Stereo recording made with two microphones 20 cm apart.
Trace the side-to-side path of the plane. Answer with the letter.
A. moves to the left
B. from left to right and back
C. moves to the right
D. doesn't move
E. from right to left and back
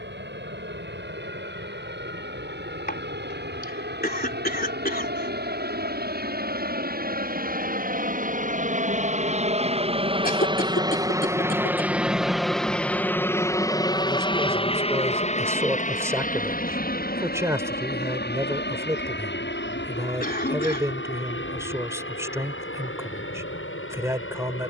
A.